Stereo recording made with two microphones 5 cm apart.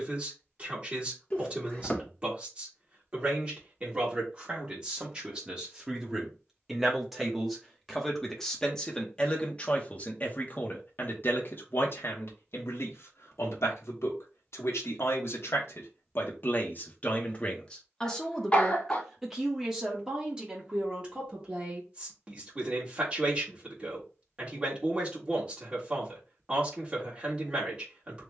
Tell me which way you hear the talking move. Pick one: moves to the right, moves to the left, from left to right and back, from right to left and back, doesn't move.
from right to left and back.